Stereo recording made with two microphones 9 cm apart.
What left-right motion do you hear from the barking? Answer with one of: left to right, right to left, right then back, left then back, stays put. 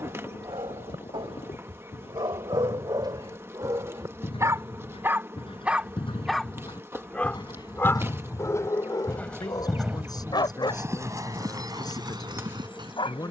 right to left.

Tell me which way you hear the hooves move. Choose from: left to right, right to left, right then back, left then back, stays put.
left to right.